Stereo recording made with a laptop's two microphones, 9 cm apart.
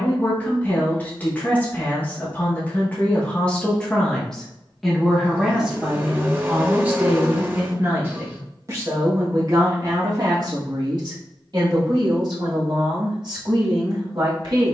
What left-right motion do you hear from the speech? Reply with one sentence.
In this clip you hear the speech move to the right.